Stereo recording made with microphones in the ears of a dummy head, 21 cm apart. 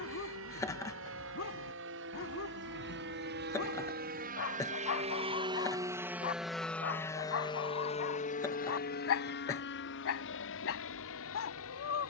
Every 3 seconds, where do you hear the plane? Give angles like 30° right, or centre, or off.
60° right, 40° right, 20° left, 50° left.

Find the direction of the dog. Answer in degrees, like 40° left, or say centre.
60° left.